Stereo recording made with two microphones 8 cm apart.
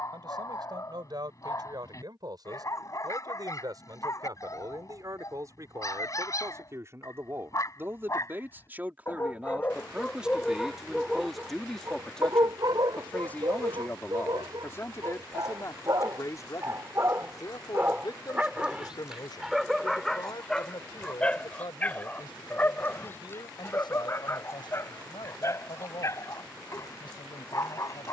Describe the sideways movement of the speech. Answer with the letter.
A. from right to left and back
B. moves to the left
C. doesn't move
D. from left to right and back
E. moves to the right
B.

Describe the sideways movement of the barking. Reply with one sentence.
In this clip you hear the barking go right and come back.